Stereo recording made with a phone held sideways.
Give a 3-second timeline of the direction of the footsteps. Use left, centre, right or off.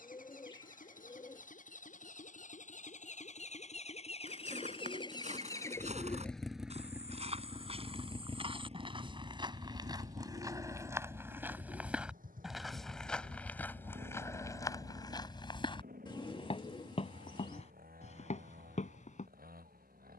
off, right, right, right, centre, left, left.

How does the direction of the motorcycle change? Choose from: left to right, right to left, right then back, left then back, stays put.
left to right.